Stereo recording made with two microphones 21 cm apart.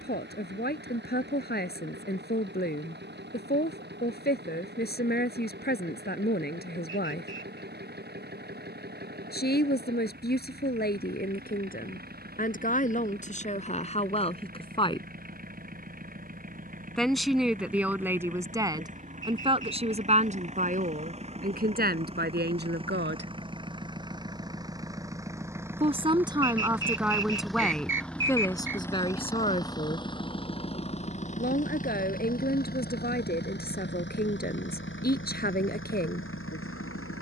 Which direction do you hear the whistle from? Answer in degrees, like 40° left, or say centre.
60° right.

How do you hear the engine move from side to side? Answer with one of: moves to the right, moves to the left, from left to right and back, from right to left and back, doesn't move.
moves to the left.